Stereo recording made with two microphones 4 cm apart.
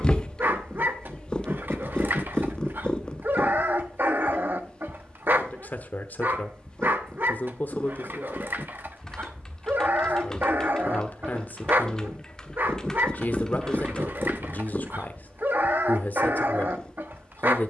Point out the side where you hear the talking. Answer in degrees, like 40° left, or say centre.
40° left.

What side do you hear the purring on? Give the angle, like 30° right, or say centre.
20° left.